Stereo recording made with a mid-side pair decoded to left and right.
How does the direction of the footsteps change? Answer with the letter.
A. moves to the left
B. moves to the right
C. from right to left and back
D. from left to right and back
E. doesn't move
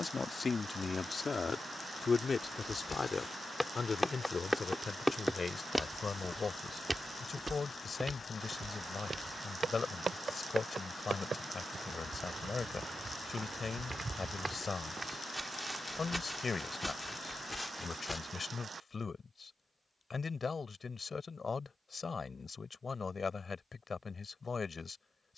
D.